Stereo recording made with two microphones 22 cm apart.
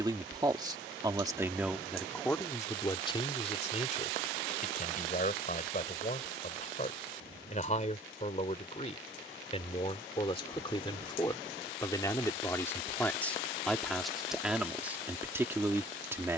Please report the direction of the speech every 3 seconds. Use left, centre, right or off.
centre, left, left, left, centre, centre.